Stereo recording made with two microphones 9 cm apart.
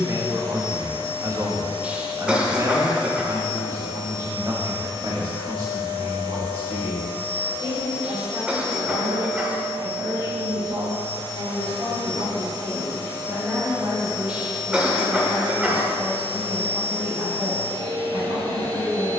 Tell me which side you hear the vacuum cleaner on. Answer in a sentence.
In this clip you hear the vacuum cleaner on the right.